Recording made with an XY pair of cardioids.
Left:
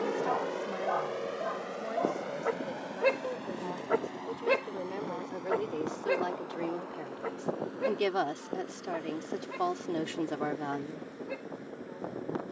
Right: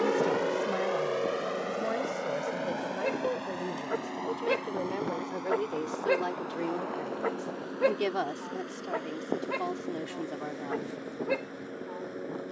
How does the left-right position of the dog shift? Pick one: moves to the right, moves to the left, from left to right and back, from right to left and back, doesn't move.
moves to the right.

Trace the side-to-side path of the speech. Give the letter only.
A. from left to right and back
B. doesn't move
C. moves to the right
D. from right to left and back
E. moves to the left
E.